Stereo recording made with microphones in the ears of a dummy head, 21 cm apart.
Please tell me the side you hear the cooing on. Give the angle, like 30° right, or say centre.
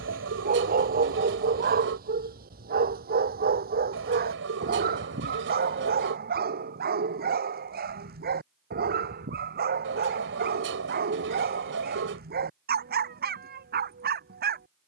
50° right.